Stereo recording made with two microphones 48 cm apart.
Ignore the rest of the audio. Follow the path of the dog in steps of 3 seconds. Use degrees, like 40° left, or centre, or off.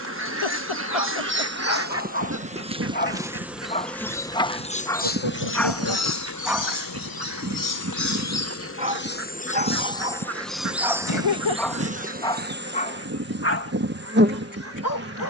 30° left, 10° left, 10° right, 10° right, 20° left.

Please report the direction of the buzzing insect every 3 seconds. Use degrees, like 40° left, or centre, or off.
20° right, 10° left, 40° left, centre, 20° right.